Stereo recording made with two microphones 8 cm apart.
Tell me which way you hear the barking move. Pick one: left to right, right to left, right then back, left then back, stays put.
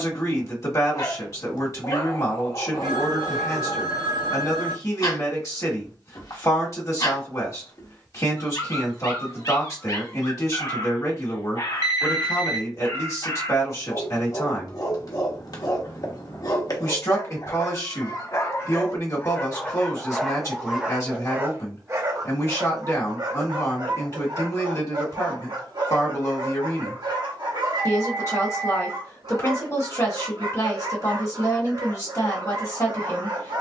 left to right.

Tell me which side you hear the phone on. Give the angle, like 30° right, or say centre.
50° right.